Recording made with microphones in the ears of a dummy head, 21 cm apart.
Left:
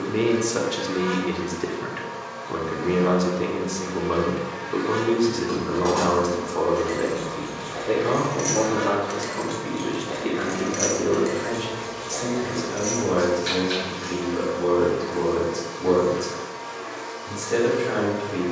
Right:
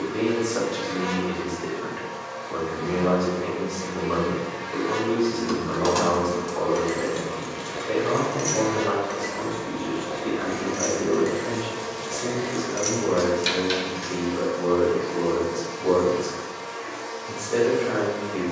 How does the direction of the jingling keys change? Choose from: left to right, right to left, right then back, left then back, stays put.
left then back.